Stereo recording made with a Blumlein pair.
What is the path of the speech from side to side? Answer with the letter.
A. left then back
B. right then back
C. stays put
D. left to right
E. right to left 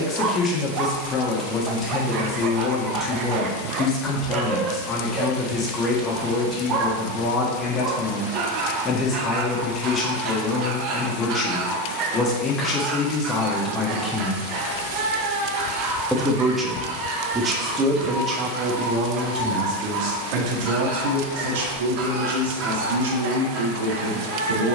D.